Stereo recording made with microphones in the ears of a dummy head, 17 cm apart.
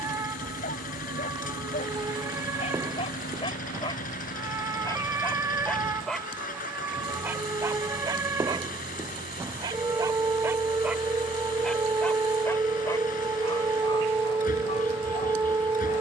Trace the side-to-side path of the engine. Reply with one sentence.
In this clip you hear the engine stay in one place.